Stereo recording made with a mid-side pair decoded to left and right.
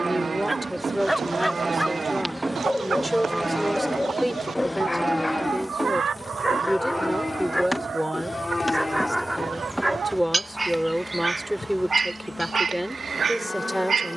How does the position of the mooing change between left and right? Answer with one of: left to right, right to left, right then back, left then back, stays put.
right to left.